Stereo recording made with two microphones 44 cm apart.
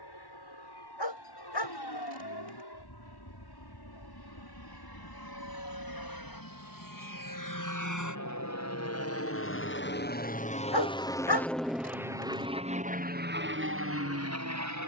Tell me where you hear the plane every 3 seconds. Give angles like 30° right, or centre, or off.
70° left, 60° left, 50° left, 20° left, 20° right.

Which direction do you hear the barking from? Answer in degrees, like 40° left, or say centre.
70° left.